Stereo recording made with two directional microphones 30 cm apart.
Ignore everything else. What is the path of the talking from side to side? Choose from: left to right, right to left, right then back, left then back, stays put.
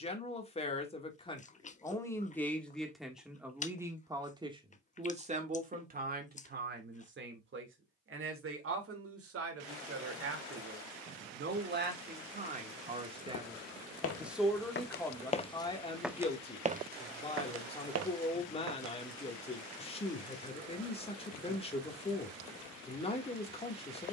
right then back.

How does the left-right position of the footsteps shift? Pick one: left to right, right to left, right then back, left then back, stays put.
left to right.